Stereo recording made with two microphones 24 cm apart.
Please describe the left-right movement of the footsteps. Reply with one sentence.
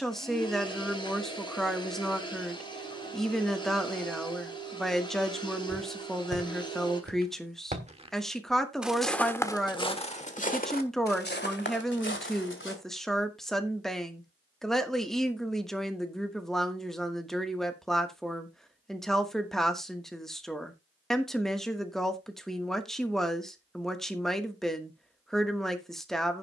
You can hear the footsteps move to the left.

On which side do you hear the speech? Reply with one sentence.
In this clip you hear the speech in the centre.